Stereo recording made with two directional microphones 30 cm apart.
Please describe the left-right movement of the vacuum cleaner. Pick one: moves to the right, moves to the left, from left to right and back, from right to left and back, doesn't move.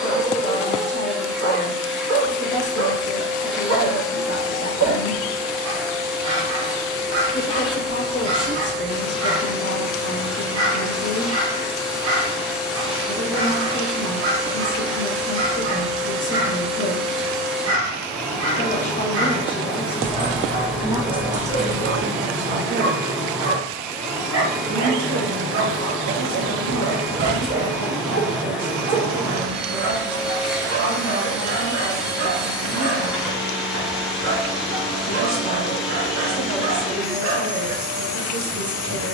doesn't move.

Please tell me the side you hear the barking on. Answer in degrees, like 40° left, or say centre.
50° right.